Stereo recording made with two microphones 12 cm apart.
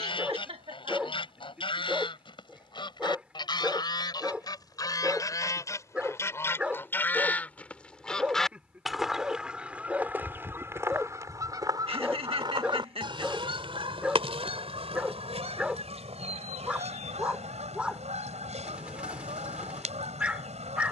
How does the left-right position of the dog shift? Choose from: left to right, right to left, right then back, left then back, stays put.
stays put.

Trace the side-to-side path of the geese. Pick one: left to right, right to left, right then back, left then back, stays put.
left to right.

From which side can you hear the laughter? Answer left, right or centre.
right.